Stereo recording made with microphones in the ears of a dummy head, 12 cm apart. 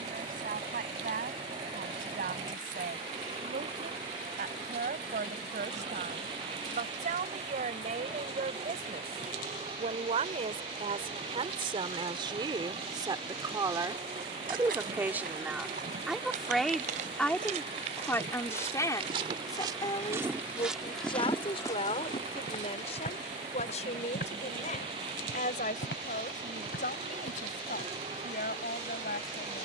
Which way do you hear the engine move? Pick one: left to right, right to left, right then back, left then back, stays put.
stays put.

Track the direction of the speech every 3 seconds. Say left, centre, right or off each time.
right, right, right, right, right, centre, left, left, left, left.